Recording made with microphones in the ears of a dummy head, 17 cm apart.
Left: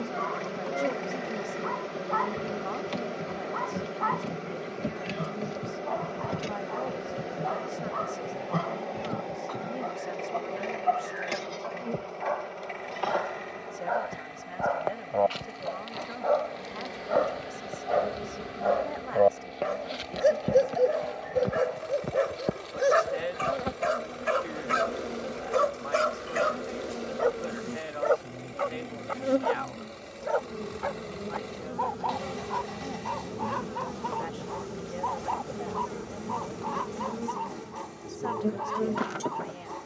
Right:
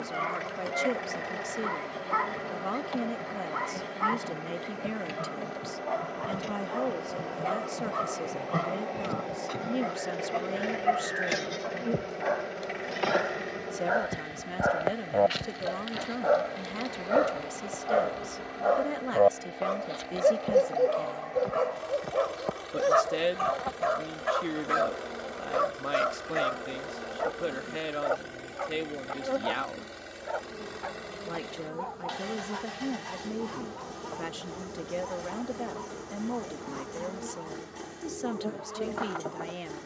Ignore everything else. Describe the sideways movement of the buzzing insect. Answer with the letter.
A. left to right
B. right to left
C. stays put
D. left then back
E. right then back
E.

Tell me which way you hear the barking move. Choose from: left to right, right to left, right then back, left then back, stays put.
right to left.